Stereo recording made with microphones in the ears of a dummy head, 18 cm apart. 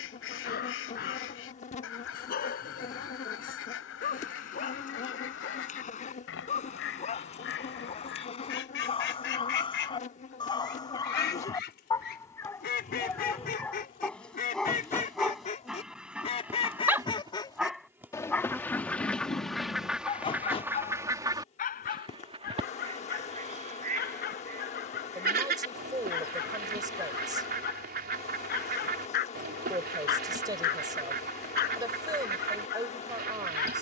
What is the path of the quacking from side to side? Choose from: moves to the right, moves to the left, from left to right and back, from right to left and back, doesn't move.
moves to the right.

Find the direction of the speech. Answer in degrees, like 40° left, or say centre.
20° right.